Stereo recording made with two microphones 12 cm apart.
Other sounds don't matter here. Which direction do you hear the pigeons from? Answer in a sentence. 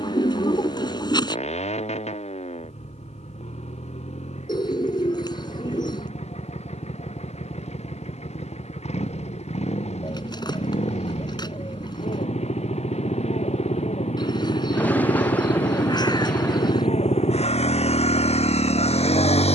You can hear the pigeons on the left.